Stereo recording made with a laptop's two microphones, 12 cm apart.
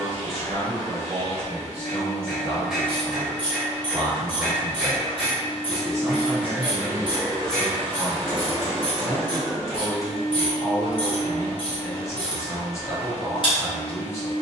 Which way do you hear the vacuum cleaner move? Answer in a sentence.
In this clip you hear the vacuum cleaner go from the left side to the right.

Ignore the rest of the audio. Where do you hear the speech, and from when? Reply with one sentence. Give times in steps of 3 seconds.
You can hear the speech on the right from 0 s, in the centre from 6 s and on the left from 9 s.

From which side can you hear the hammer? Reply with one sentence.
In this clip you hear the hammer in the centre.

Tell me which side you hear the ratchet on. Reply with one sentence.
In this clip you hear the ratchet on the left.